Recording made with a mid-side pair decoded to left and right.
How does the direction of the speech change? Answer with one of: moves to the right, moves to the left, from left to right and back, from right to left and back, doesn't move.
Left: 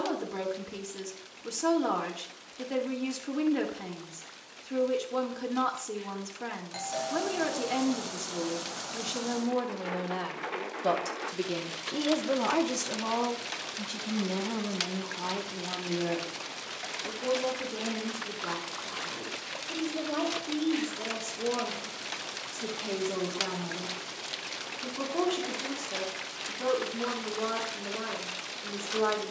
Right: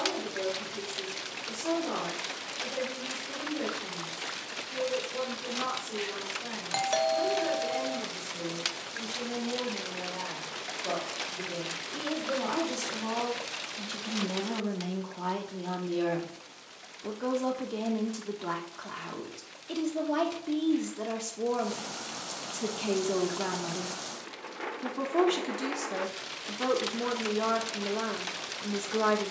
moves to the right.